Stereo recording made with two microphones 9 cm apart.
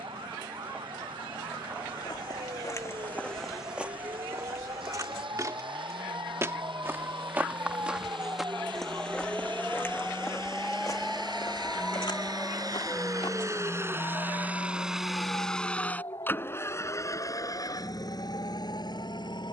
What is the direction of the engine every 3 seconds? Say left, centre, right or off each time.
right, right, right, right, right, left, left.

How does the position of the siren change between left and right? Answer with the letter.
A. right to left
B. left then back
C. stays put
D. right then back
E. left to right
A.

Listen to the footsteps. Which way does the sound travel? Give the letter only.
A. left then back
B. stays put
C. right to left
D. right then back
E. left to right
D.